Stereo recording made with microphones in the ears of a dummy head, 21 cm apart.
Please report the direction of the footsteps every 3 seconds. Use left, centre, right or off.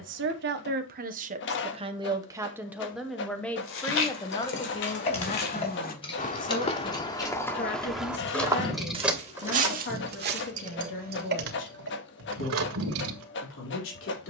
off, left, centre, right, off.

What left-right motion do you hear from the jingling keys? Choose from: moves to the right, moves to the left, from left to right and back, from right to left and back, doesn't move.
moves to the right.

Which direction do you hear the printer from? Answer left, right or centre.
left.